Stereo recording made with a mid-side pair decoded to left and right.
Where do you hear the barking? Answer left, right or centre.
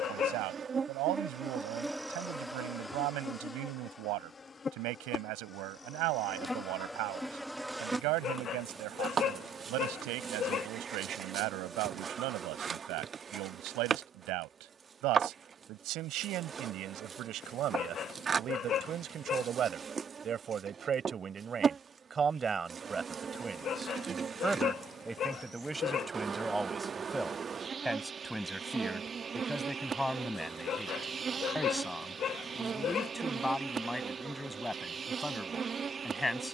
left.